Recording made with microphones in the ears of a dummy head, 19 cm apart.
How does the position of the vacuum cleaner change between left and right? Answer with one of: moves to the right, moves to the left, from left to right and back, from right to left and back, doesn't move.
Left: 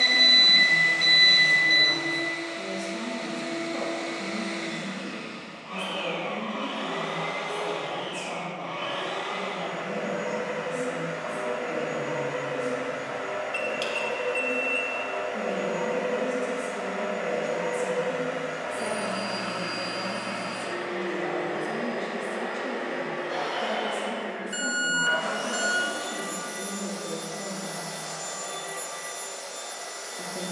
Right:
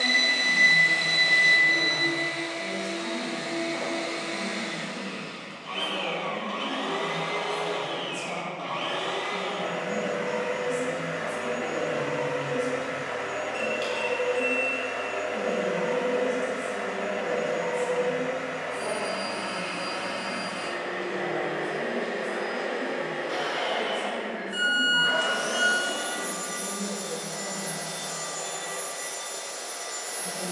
from right to left and back.